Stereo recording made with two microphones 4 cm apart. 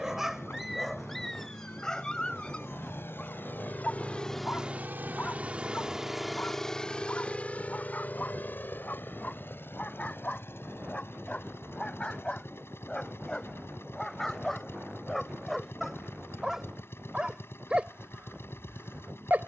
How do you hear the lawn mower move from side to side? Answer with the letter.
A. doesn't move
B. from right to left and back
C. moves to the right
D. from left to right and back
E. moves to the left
D.